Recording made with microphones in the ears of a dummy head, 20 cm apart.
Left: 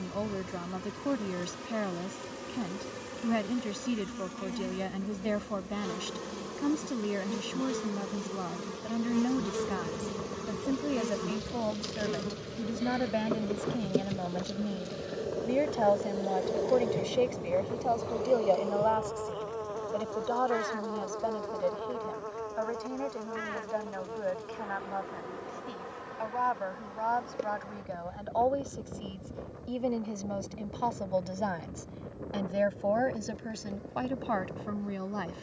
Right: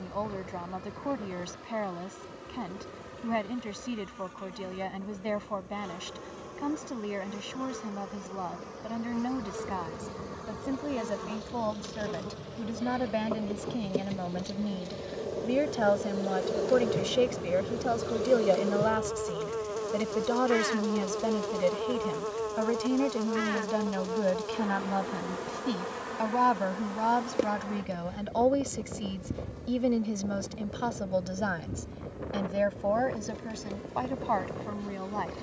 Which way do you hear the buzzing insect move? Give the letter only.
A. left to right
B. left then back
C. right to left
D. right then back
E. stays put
A.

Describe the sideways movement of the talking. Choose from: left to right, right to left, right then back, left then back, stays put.
right then back.